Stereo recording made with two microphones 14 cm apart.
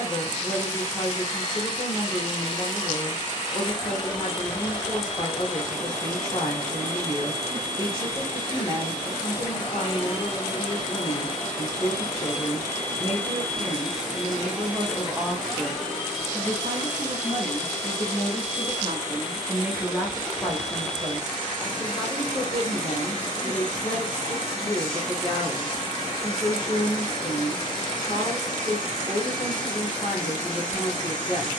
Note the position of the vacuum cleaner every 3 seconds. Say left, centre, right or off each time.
left, left, left, left, centre, centre, left, left, left, left, left.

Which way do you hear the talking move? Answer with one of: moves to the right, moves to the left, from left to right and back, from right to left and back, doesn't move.
from left to right and back.